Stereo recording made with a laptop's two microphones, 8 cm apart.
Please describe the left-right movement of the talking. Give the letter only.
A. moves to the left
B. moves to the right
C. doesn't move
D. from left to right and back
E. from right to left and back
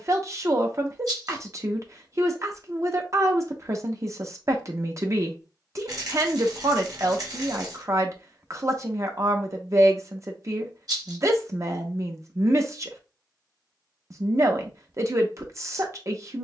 C.